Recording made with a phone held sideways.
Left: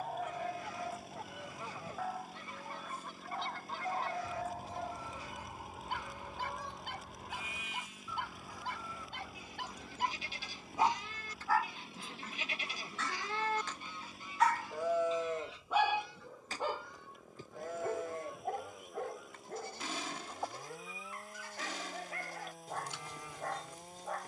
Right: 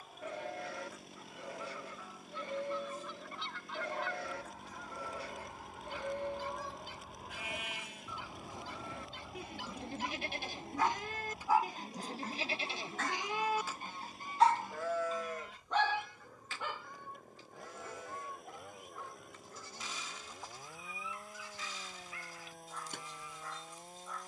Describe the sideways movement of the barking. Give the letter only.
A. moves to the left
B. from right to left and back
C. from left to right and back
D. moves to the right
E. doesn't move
C.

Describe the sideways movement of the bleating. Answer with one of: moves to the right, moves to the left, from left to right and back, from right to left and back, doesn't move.
moves to the left.